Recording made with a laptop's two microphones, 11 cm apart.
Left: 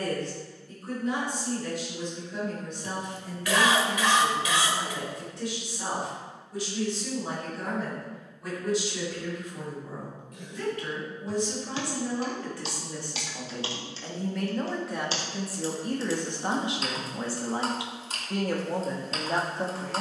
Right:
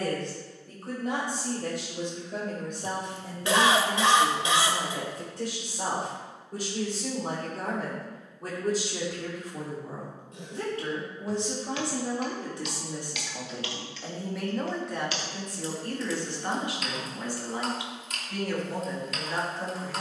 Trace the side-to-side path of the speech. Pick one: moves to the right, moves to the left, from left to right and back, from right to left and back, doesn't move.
moves to the left.